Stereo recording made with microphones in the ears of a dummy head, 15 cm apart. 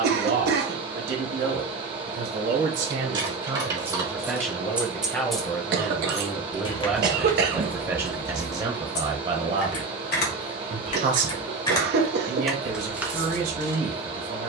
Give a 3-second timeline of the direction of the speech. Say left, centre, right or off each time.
right, centre, centre, right, right.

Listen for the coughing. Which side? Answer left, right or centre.
right.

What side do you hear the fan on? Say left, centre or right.
right.